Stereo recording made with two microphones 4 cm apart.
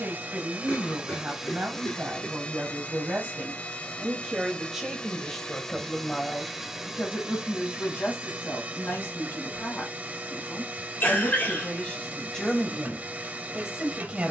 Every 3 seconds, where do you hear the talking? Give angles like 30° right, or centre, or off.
50° right, 10° right, 40° left, 40° left, 10° right.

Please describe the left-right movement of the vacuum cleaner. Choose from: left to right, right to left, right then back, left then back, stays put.
left then back.